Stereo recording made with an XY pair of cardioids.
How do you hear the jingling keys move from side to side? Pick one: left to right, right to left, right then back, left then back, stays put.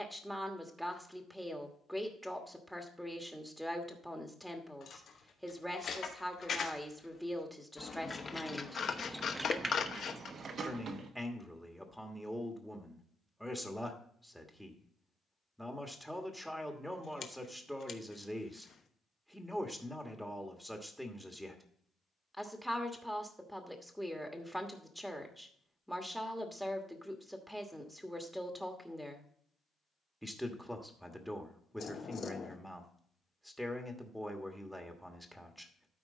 left to right.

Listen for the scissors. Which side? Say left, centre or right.
left.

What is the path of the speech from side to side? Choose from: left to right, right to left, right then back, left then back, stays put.
stays put.